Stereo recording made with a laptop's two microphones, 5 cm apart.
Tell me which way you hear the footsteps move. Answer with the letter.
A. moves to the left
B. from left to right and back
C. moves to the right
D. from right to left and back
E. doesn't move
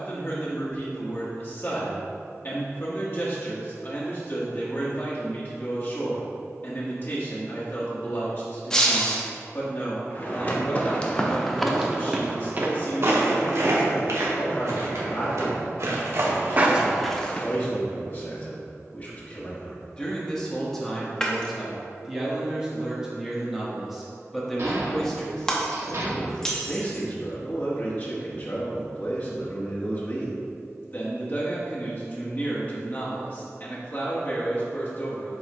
B.